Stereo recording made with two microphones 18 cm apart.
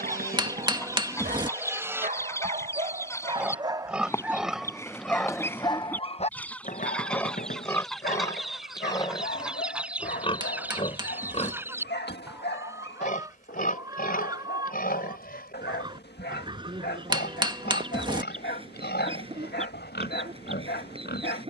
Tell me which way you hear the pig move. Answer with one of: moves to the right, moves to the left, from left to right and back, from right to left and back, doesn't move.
moves to the left.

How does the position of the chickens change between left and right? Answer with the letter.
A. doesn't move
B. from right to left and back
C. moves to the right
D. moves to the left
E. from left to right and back
C.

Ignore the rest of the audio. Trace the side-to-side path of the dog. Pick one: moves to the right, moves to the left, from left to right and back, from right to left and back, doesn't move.
moves to the left.